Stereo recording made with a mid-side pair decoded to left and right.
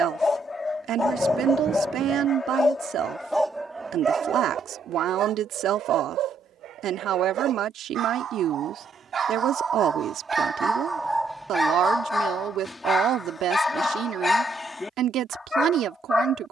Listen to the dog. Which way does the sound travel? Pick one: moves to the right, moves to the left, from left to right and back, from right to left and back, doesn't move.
from left to right and back.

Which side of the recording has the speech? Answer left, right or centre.
right.